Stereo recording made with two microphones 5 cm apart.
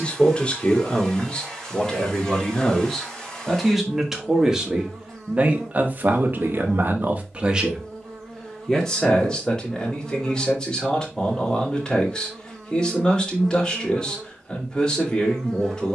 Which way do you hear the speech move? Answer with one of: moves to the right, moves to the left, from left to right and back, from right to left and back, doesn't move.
from left to right and back.